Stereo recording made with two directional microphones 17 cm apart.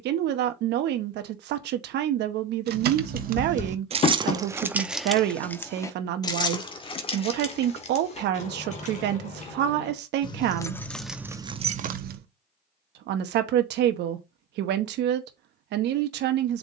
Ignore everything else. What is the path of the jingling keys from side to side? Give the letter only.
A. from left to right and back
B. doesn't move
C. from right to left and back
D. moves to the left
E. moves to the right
C.